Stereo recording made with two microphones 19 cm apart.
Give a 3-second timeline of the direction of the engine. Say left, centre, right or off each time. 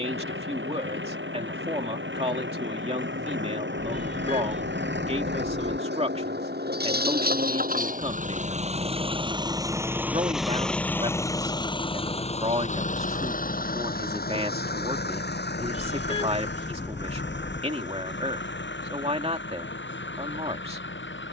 right, right, right, centre, left, left, left.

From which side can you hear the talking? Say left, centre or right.
right.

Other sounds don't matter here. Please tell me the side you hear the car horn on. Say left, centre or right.
left.